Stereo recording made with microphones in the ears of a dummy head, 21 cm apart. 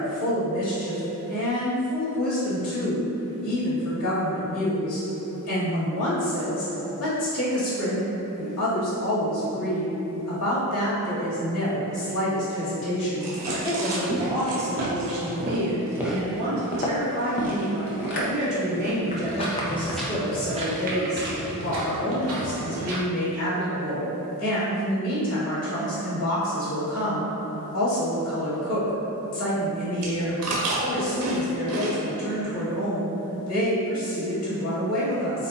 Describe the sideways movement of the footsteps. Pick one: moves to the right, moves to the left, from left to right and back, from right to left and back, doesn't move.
from right to left and back.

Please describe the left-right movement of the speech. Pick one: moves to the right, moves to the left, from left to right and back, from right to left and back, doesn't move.
from left to right and back.